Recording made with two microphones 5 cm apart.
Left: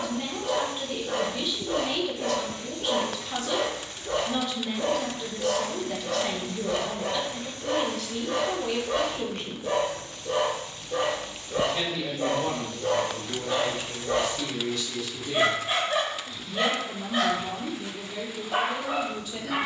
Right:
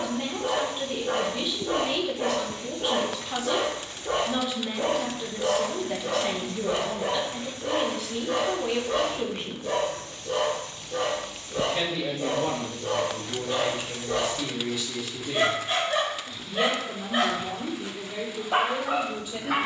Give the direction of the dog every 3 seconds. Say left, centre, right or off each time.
right, right, centre, left, left, centre, right.